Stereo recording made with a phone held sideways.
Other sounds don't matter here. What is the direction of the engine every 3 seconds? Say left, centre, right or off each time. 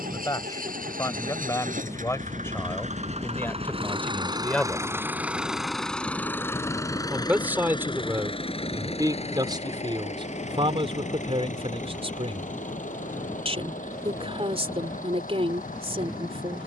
right, right, left, left, left, left.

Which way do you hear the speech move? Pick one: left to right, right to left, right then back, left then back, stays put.
left to right.